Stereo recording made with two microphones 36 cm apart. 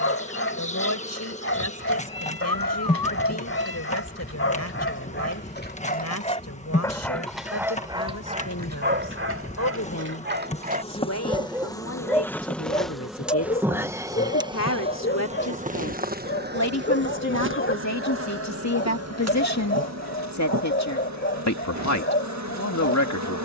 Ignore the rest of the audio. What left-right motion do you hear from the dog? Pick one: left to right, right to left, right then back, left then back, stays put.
right then back.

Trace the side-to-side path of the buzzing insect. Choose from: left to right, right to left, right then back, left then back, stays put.
left to right.